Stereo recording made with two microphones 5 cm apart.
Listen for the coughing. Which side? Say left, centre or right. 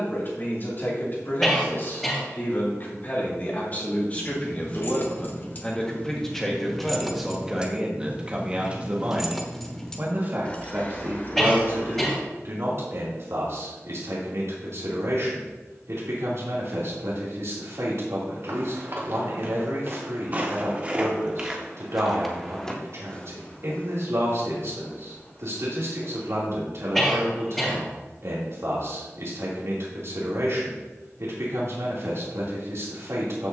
centre.